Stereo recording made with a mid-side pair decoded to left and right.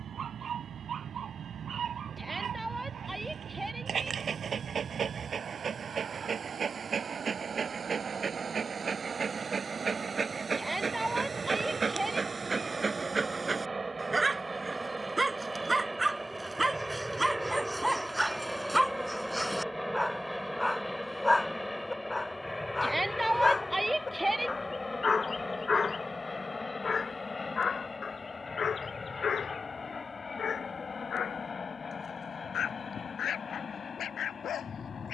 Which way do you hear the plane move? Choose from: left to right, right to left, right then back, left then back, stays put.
right to left.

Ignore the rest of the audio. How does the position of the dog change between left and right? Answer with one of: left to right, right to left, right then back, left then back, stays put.
right to left.